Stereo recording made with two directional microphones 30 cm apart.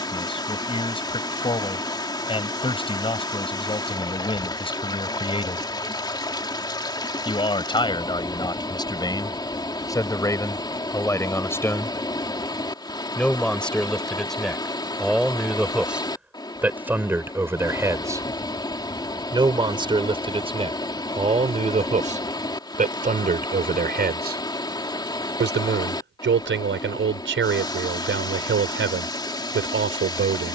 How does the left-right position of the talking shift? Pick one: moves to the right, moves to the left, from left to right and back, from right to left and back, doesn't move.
moves to the right.